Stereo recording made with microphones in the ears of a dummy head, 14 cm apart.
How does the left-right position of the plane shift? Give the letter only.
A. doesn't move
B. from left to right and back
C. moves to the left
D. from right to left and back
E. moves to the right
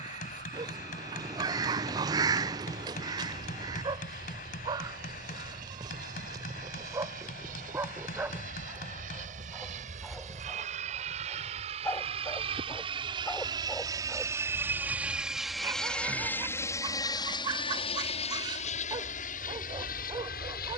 C.